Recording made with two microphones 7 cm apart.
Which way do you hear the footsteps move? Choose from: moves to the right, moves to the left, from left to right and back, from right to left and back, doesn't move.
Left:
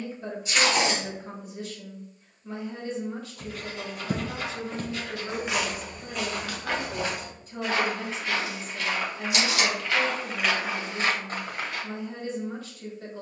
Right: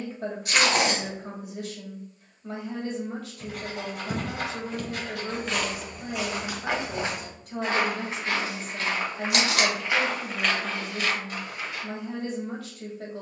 from left to right and back.